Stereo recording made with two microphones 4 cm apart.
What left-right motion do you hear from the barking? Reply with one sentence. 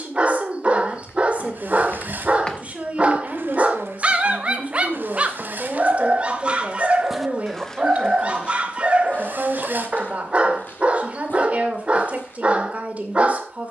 You can hear the barking stay in one place.